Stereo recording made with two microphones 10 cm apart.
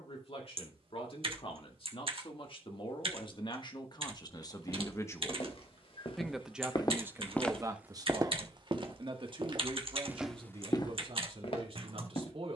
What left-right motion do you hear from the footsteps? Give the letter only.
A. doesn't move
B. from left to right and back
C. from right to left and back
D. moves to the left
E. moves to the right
B.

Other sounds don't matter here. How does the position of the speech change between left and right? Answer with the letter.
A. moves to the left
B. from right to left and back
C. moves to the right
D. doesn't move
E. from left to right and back
C.